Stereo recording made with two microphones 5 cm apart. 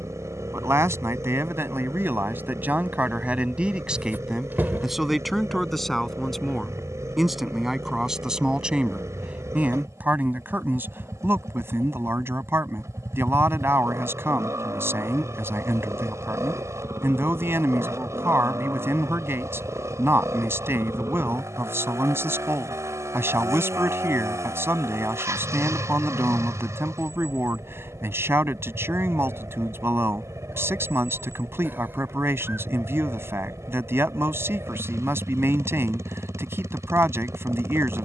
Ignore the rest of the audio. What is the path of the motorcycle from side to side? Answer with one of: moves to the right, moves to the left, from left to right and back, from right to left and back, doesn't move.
doesn't move.